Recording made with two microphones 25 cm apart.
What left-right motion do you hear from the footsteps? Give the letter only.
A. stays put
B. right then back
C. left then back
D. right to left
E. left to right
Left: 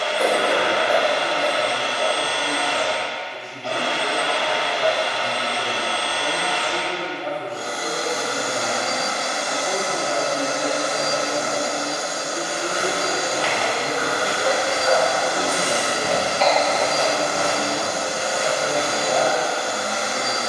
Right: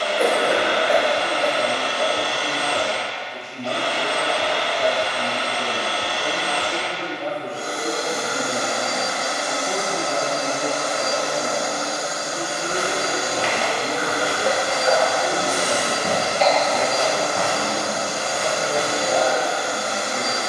C.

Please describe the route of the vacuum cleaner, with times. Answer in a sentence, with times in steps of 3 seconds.
In this clip you hear the vacuum cleaner on the right from 0 s, in the centre from 9 s, on the left from 12 s and in the centre from 18 s.